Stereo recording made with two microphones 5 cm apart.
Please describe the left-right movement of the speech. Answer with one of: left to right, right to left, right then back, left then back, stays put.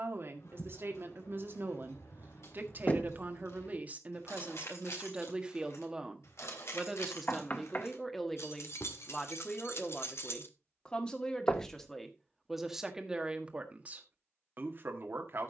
left then back.